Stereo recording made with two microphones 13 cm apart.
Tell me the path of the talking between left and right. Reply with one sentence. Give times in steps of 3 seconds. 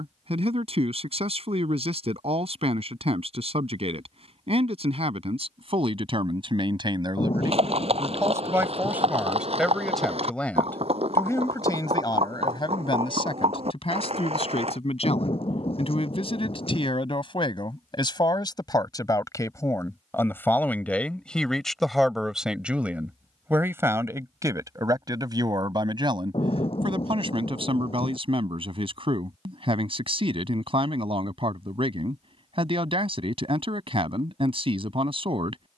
You can hear the talking on the right from 0 s, in the centre from 9 s, on the left from 12 s, in the centre from 21 s and on the right from 24 s.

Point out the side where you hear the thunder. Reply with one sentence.
In this clip you hear the thunder on the left.